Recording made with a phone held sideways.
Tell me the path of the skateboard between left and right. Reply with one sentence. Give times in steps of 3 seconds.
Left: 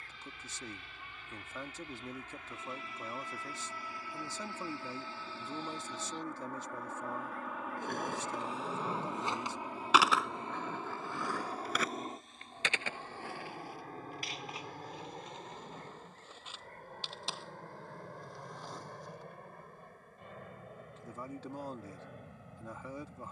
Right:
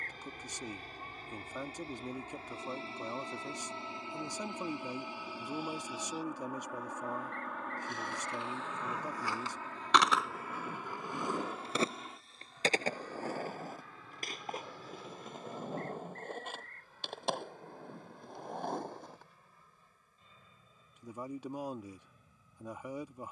You can hear the skateboard not at all from 0 s, on the left from 6 s, in the centre from 9 s, on the right from 12 s and not at all from 21 s.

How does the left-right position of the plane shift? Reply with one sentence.
In this clip you hear the plane move from right to left.